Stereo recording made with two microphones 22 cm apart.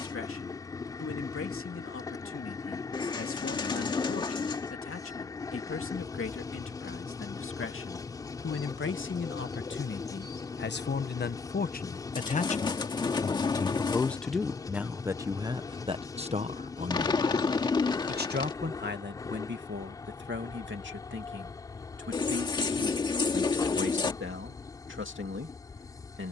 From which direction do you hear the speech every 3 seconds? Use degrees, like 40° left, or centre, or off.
80° left, 80° left, 70° left, 50° left, 10° left, 30° right, 50° right, 60° right, 60° right.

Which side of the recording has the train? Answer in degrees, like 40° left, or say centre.
20° left.